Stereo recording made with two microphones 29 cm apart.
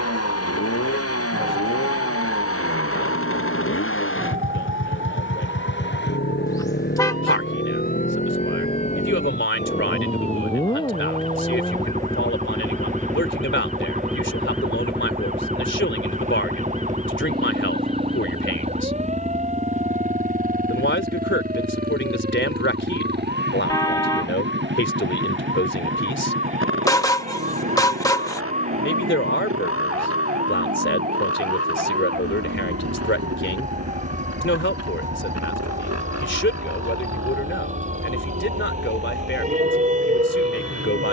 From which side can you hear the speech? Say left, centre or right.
left.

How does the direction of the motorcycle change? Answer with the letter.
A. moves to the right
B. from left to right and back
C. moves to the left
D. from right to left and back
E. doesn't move
A.